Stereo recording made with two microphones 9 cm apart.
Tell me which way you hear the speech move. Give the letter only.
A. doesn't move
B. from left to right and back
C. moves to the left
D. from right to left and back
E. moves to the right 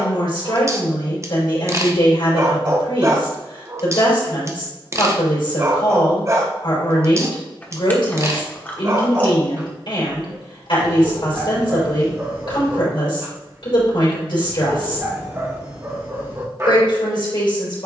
A.